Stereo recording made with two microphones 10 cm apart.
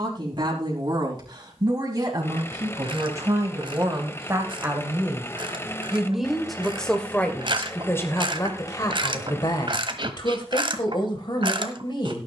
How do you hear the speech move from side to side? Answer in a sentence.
In this clip you hear the speech travel towards the left.